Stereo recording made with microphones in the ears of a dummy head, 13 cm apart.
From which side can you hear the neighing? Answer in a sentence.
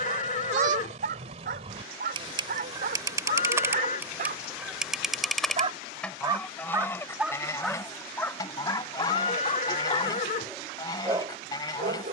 In this clip you hear the neighing on the left.